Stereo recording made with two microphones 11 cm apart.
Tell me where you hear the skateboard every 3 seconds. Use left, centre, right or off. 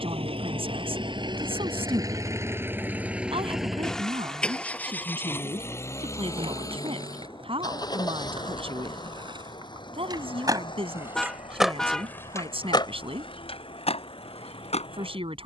off, off, right, right, left.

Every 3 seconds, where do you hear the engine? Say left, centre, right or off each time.
right, centre, left, left, left.